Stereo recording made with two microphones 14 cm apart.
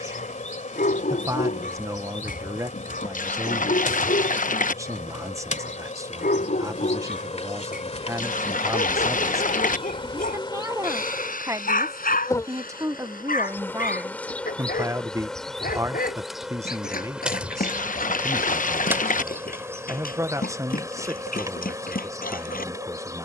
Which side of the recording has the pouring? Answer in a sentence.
You can hear the pouring on the left.